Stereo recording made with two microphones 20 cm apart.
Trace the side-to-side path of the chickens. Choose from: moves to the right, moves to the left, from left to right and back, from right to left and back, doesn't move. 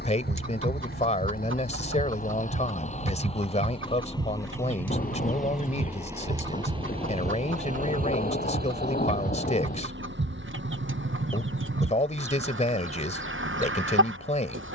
doesn't move.